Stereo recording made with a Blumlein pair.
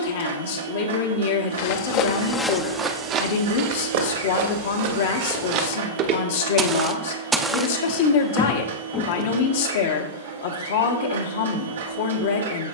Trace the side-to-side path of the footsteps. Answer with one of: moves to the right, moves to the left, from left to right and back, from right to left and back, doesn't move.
from left to right and back.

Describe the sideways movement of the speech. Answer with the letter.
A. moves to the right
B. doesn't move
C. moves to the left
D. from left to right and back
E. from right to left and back
B.